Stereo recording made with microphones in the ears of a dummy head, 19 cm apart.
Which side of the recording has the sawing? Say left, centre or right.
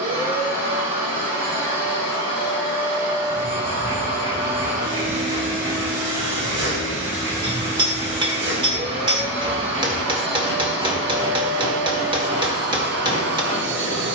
right.